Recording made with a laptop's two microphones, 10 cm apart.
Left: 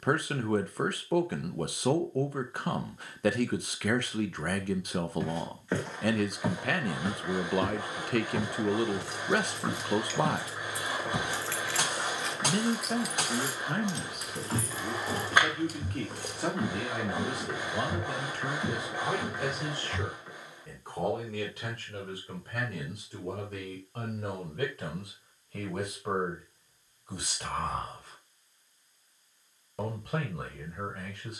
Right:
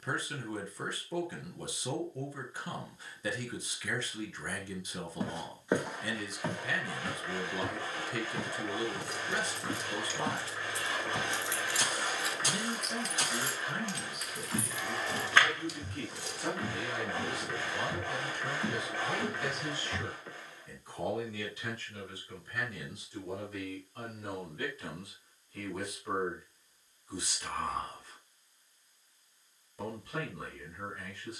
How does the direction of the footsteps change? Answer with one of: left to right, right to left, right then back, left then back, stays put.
left then back.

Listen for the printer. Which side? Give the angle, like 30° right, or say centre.
20° left.